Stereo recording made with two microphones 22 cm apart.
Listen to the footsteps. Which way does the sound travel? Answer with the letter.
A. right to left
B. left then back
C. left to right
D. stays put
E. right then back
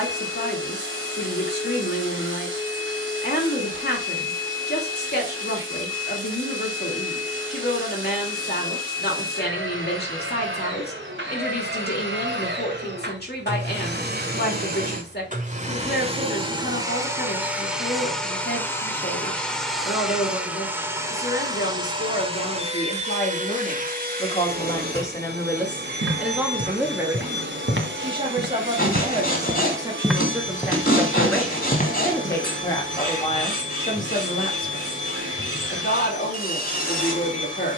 A.